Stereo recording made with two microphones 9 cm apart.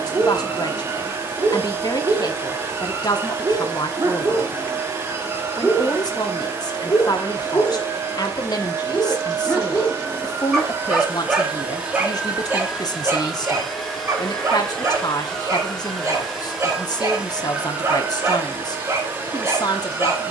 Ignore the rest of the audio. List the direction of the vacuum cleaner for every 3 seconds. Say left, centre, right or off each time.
right, right, right, right, centre, centre, right.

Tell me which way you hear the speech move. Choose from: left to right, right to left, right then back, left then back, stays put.
stays put.